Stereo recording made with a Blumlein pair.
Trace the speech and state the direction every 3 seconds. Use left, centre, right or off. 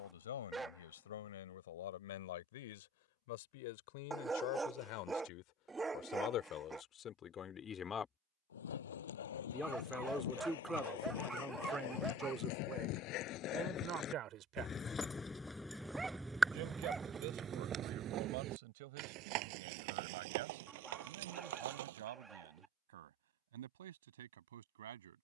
left, left, left, centre, right, right, right, right, right.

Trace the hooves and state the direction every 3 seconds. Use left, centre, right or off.
off, off, left, left, left, centre, right, right, off.